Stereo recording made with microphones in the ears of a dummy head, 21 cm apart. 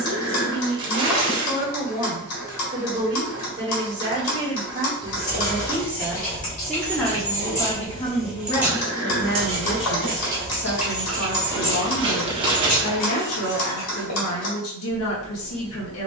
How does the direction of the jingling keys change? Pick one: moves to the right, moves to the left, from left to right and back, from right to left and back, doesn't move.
from left to right and back.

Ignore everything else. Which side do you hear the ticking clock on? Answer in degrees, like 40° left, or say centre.
70° left.